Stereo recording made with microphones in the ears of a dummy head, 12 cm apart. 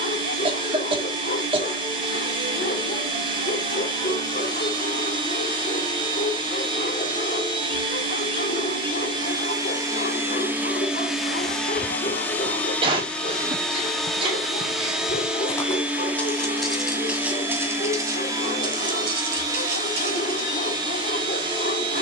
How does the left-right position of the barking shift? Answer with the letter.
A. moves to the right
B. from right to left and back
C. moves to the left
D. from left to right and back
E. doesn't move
E.